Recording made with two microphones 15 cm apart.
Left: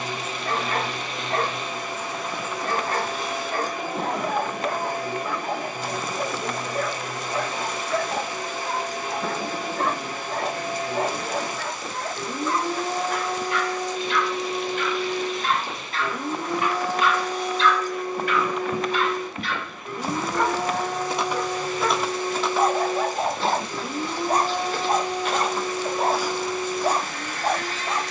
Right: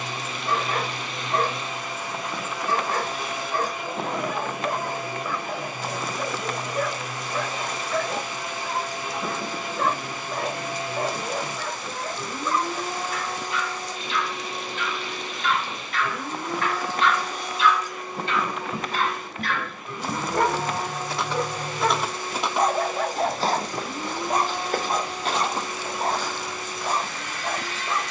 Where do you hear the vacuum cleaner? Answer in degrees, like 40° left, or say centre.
40° left.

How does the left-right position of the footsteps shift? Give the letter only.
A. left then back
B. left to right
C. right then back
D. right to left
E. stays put
C.